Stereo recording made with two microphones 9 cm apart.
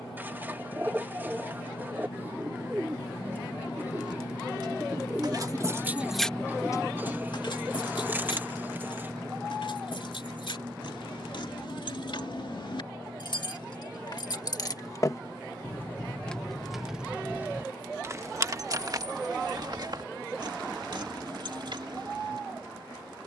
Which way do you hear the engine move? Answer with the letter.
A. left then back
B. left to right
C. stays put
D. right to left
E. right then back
B.